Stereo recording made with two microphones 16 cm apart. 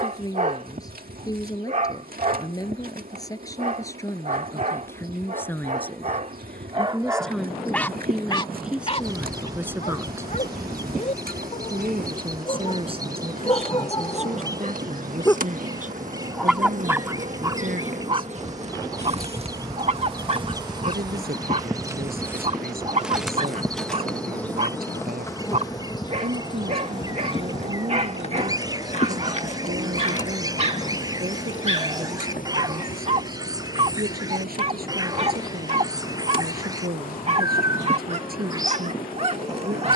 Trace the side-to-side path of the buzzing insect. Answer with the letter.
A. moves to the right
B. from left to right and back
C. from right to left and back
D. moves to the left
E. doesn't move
D.